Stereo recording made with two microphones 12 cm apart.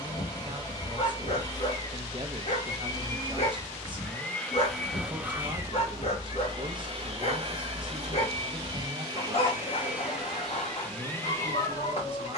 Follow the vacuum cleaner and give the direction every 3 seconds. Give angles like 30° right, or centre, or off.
30° left, 10° left, 40° right, centre.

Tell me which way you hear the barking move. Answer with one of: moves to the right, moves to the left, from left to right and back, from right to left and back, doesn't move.
doesn't move.